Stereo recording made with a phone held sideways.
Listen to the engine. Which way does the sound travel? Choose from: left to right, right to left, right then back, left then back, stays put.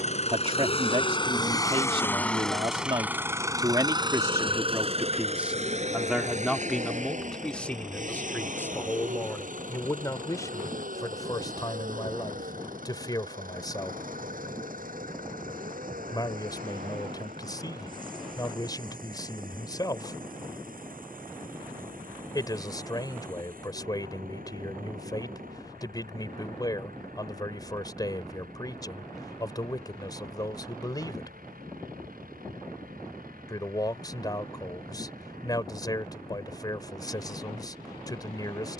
left to right.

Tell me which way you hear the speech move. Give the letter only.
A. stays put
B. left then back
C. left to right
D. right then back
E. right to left
E.